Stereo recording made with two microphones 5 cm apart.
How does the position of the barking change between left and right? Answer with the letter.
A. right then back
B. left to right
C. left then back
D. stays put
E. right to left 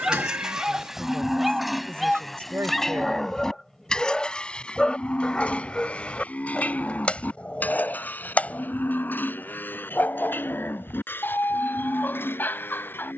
E.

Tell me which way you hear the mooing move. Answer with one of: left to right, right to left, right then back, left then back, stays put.
right to left.